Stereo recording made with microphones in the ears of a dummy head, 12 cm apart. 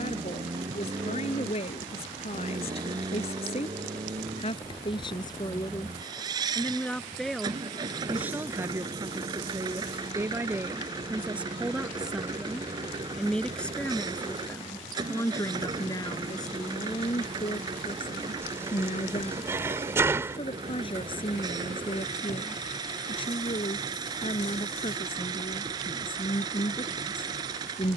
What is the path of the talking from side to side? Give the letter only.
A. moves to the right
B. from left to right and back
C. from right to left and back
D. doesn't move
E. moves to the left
B.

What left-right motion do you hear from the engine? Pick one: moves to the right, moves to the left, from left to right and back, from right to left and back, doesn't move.
doesn't move.